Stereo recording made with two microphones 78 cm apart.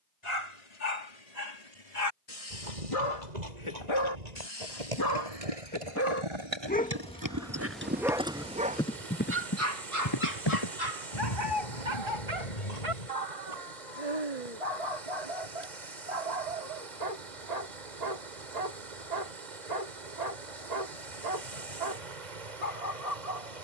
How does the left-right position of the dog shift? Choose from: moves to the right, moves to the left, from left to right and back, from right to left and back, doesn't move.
moves to the right.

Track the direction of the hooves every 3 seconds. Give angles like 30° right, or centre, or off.
60° right, 50° right, 20° right, 30° left, 50° left, off, off, off.